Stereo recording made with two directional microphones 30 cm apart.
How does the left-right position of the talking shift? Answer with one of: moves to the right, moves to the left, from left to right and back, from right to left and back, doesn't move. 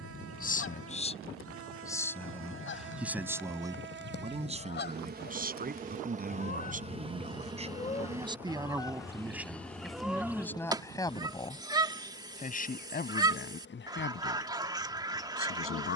from left to right and back.